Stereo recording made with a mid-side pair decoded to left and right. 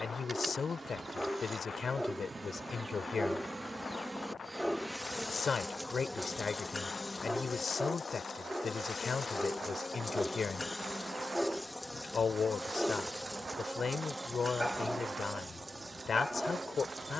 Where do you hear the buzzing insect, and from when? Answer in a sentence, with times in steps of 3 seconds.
You can hear the buzzing insect on the right from 0 s, in the centre from 3 s, on the left from 6 s, in the centre from 12 s and on the right from 15 s.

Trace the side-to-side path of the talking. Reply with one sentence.
You can hear the talking stay put.